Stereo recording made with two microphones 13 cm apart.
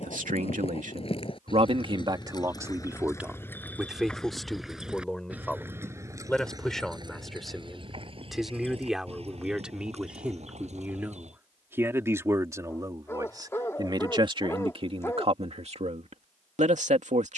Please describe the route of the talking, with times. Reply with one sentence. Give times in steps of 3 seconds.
In this clip you hear the talking on the right from 0 s, in the centre from 3 s and on the right from 12 s.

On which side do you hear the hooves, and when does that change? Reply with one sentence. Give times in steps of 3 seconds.
You can hear the hooves on the left from 0 s, in the centre from 3 s, on the right from 6 s and not at all from 12 s.